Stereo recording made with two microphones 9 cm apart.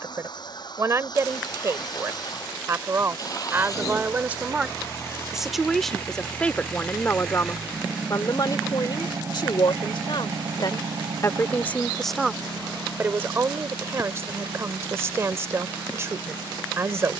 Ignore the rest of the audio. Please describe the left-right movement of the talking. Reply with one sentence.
In this clip you hear the talking move from right to left and back again.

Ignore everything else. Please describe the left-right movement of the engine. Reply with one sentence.
In this clip you hear the engine move to the right.